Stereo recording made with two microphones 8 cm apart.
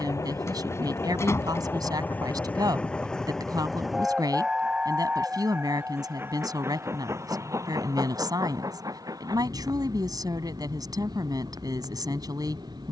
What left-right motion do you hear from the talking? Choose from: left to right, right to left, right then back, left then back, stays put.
stays put.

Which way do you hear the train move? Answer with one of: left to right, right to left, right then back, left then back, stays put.
left to right.